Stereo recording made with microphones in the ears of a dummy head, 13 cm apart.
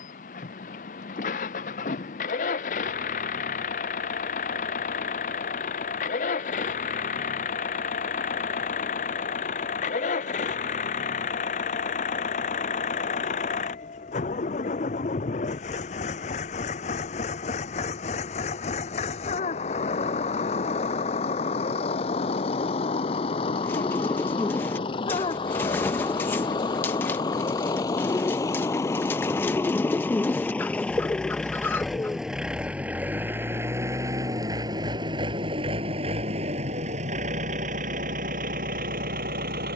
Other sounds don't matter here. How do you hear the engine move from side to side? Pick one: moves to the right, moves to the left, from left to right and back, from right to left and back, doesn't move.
moves to the right.